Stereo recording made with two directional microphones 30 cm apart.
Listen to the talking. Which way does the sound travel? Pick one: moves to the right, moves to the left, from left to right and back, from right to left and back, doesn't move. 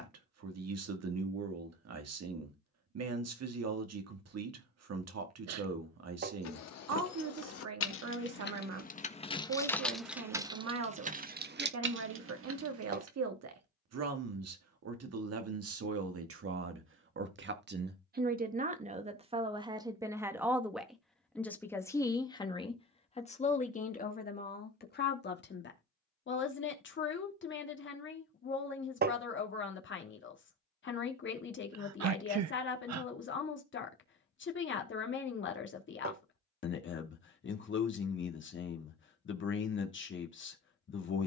moves to the left.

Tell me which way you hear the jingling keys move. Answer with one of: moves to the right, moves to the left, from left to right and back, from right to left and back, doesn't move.
moves to the right.